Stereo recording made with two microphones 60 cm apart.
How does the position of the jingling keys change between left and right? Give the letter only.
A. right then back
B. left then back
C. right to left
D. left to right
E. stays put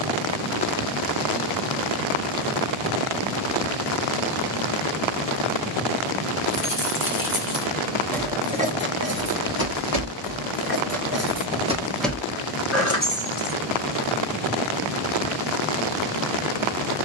A.